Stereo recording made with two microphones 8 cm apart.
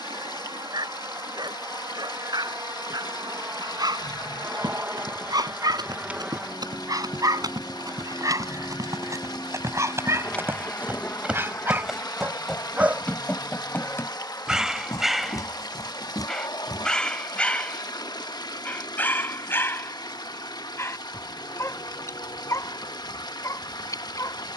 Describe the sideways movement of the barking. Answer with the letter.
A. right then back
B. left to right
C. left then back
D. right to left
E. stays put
D.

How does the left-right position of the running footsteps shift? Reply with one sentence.
You can hear the running footsteps travel towards the left.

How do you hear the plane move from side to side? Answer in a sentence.
In this clip you hear the plane move to the left.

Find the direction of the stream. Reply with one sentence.
You can hear the stream on the left.